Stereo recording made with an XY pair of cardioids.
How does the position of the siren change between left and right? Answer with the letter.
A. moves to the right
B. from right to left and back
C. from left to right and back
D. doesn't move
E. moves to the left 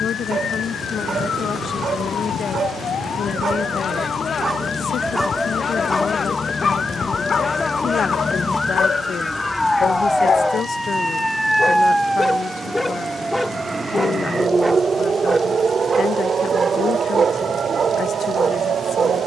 A.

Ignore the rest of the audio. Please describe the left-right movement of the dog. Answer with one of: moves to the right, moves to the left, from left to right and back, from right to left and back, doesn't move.
from right to left and back.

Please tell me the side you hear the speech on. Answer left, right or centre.
left.